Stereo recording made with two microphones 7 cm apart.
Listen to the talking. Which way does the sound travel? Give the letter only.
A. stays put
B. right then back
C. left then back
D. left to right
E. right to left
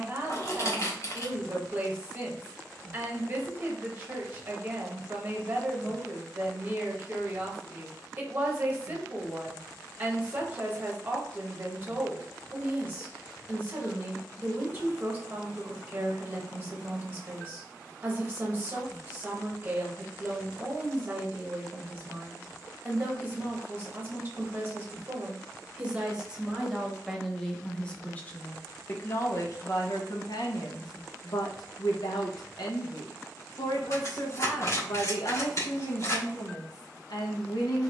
E.